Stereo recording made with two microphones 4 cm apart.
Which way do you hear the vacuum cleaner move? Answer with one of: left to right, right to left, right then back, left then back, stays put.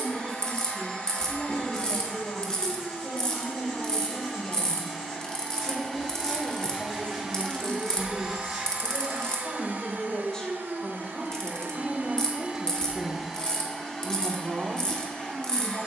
right then back.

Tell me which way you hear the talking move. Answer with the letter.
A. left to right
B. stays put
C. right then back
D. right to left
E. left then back
A.